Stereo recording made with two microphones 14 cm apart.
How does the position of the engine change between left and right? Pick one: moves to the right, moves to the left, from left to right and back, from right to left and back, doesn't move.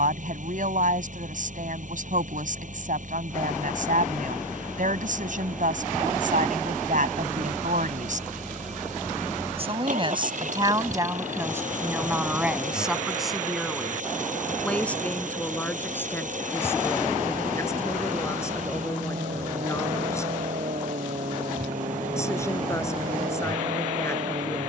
doesn't move.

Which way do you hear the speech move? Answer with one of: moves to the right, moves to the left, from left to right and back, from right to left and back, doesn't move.
moves to the left.